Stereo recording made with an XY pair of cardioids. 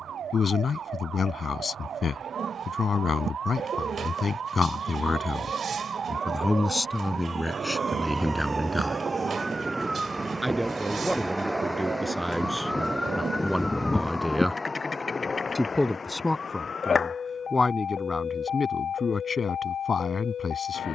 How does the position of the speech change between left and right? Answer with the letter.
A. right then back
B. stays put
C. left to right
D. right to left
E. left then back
A.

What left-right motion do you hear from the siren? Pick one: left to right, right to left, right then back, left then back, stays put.
right to left.